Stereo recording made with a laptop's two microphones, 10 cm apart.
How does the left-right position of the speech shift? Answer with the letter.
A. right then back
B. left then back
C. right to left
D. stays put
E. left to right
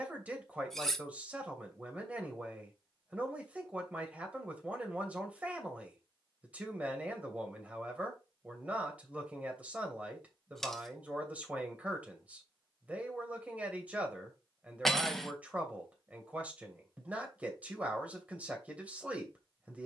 D.